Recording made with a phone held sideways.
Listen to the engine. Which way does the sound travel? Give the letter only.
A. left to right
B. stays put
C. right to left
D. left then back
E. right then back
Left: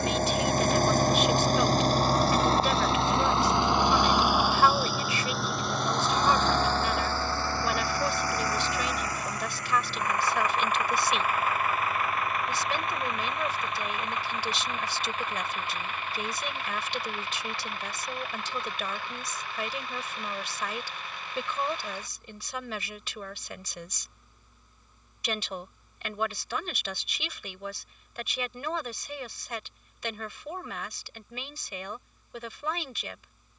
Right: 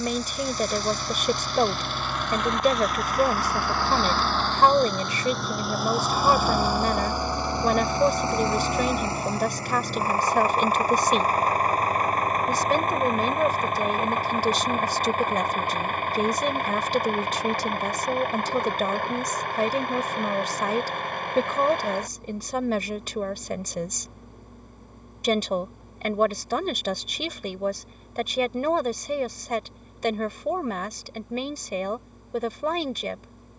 A.